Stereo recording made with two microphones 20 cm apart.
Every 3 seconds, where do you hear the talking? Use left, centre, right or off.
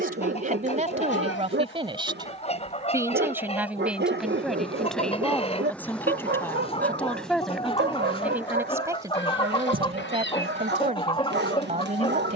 right, centre, centre, right.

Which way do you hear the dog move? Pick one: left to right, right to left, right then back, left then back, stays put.
stays put.